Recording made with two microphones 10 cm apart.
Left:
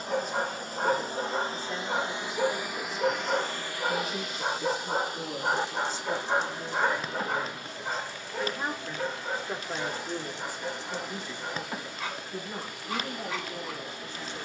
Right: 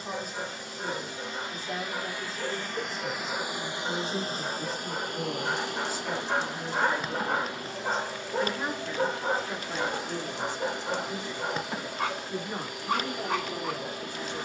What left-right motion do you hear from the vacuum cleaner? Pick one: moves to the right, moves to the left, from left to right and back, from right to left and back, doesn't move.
moves to the right.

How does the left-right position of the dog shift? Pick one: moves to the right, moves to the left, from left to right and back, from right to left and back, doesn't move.
moves to the right.